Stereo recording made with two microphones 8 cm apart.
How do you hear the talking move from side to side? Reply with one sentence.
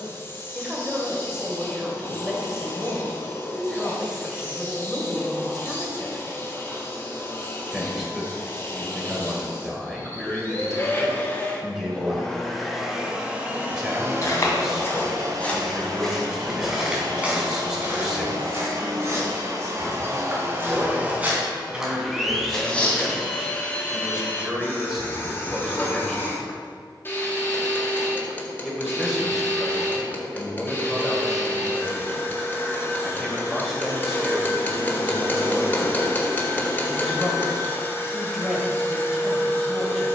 In this clip you hear the talking stay put.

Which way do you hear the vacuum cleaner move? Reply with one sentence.
In this clip you hear the vacuum cleaner go right and come back.